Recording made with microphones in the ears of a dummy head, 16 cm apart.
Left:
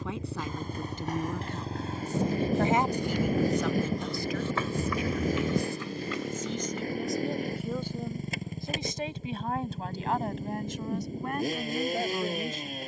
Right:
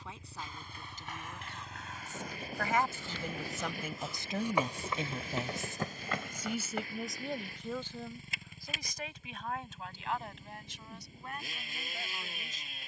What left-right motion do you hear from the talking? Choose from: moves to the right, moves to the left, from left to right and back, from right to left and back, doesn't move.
from left to right and back.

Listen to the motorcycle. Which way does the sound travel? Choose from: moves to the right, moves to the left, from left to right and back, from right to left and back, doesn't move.
doesn't move.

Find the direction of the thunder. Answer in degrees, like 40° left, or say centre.
60° left.